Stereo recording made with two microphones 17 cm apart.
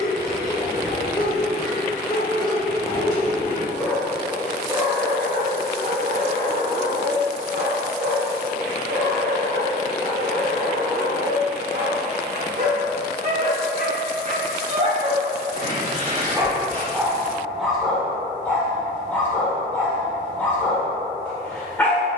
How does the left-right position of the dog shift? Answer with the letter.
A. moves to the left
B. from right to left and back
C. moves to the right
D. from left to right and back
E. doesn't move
D.